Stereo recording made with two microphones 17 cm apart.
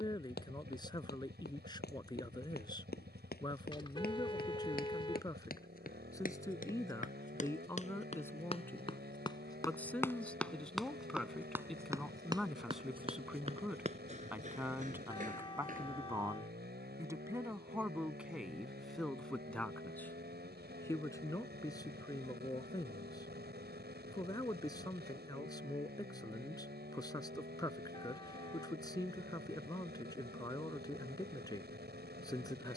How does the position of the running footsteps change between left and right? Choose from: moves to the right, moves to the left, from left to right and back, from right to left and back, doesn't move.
moves to the right.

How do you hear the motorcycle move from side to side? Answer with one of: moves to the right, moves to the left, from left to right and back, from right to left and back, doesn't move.
doesn't move.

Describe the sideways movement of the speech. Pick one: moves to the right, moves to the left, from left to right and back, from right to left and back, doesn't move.
from left to right and back.